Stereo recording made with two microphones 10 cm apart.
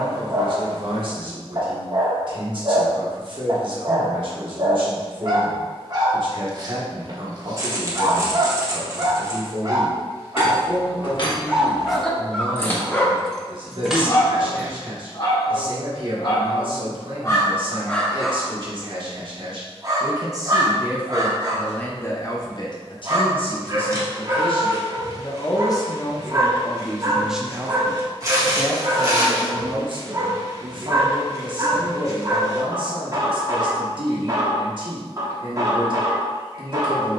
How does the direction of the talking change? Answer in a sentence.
You can hear the talking move from right to left and back again.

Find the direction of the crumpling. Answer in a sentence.
In this clip you hear the crumpling on the right.